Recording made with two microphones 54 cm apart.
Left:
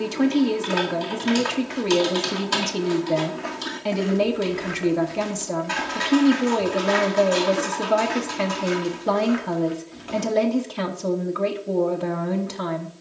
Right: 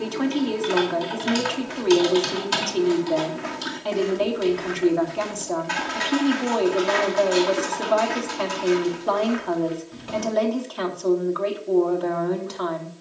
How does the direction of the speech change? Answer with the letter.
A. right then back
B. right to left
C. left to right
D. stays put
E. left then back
D.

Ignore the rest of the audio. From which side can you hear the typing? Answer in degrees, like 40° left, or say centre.
10° right.